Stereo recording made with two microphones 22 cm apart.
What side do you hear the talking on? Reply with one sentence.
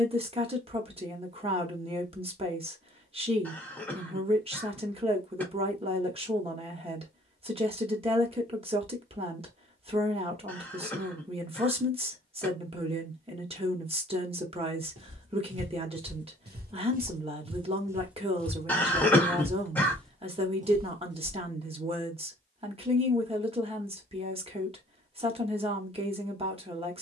You can hear the talking on the right.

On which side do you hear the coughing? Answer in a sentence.
You can hear the coughing in the centre.